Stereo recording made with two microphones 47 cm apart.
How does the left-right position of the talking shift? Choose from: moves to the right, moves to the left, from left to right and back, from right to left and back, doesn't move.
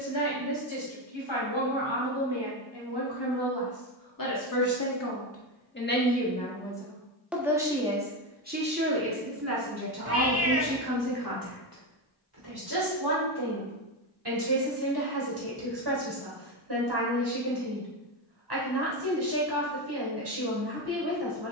moves to the right.